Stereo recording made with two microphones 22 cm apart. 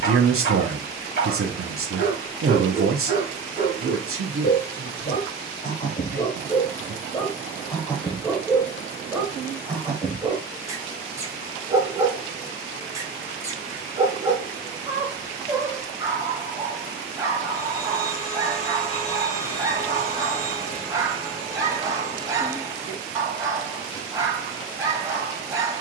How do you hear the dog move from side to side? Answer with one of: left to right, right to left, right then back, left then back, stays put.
left to right.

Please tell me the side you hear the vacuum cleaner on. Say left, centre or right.
left.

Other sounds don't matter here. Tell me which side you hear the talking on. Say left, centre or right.
right.